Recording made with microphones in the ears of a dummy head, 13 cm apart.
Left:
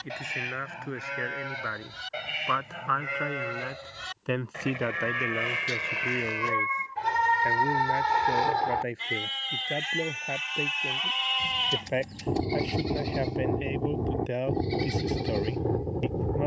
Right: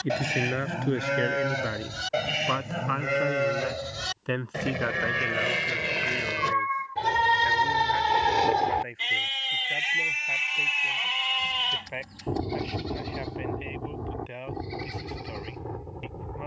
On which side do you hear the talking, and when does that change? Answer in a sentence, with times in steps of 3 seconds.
In this clip you hear the talking on the right from 0 s, in the centre from 3 s and on the left from 6 s.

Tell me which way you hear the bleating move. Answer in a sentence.
In this clip you hear the bleating move from right to left.